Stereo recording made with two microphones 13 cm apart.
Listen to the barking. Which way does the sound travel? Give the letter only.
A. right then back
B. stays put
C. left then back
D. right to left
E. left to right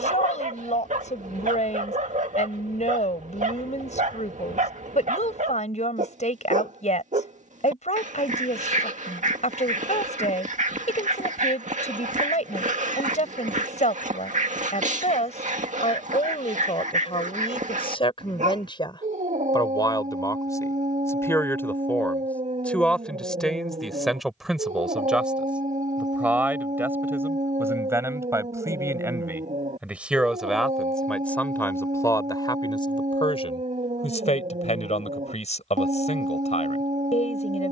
B.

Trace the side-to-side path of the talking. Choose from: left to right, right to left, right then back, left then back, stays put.
right then back.